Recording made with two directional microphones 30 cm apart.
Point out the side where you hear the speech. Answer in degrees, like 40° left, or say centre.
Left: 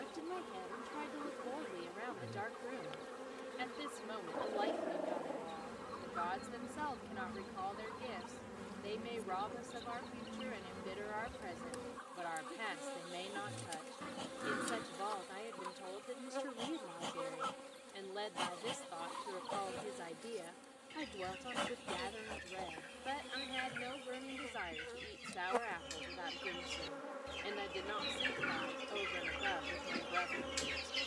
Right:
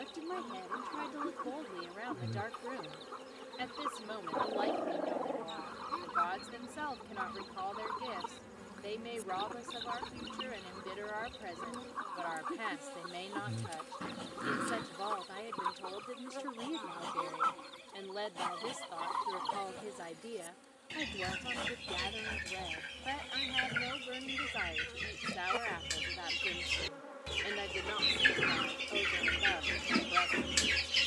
20° right.